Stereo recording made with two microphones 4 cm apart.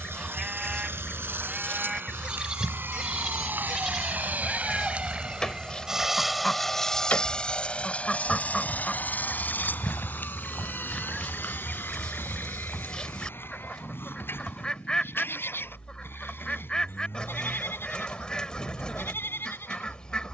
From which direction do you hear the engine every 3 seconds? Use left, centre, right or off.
right, right, left, left, left, left, left.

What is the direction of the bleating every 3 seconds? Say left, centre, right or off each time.
right, centre, left, left, left, left, left.